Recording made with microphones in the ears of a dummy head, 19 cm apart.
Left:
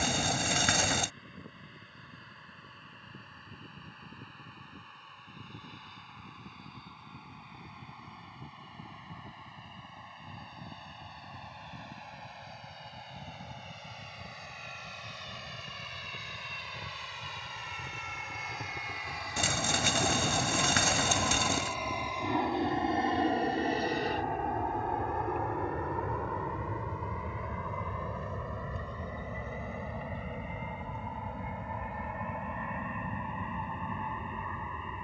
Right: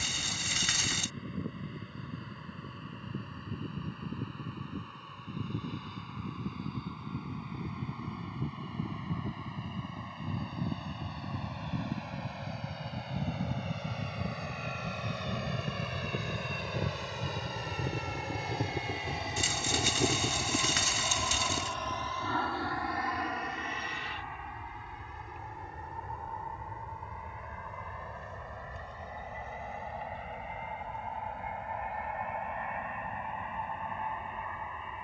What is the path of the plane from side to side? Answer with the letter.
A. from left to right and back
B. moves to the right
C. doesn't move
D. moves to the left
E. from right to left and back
D.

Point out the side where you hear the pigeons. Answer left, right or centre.
left.